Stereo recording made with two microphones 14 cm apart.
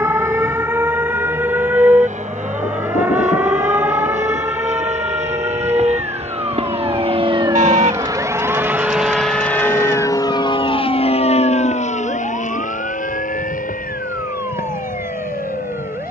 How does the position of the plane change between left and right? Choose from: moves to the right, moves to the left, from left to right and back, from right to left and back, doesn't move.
moves to the left.